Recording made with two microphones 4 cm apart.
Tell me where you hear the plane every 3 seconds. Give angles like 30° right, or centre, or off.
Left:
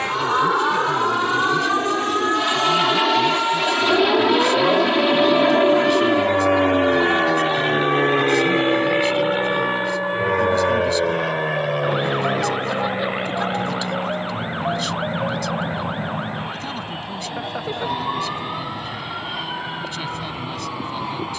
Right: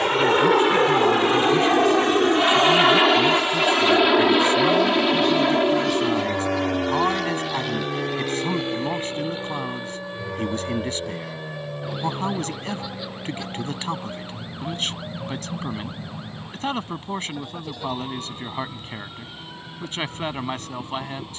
30° right, centre, 30° left, 50° left, 60° left, 70° left, 70° left.